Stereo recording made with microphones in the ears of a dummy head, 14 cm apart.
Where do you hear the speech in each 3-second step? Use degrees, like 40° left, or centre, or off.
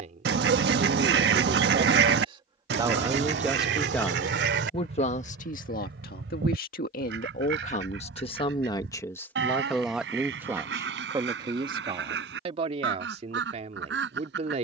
40° right, 20° left, 50° left, 10° right, 40° right.